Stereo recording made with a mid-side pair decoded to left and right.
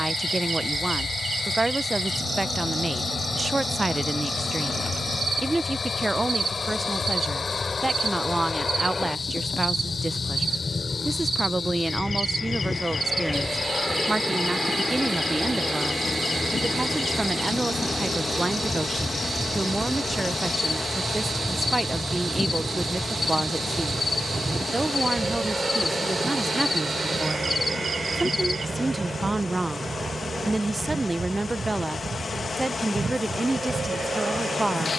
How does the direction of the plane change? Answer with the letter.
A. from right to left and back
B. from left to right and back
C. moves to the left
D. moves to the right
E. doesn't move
D.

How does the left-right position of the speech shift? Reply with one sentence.
In this clip you hear the speech stay in one place.